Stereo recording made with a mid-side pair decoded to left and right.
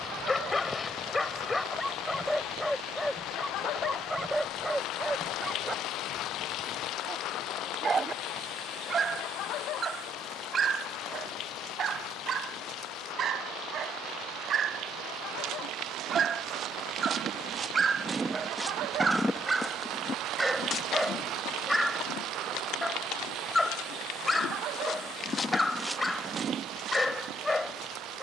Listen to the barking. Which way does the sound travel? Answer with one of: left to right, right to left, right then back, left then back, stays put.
right then back.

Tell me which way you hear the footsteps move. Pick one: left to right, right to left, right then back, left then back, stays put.
left then back.